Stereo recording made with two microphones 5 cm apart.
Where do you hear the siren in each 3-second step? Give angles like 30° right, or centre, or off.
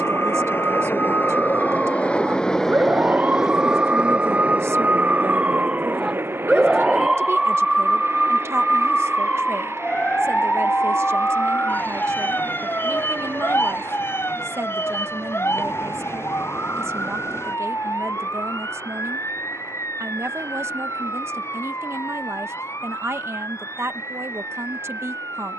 50° right, 30° right, centre, 30° left, 50° left, 60° left, 70° left, 70° left, 70° left.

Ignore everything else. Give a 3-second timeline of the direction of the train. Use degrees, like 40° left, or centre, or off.
40° left, 30° right, 60° right, 70° right, 70° right, 70° right, 70° right, 70° right, 80° right.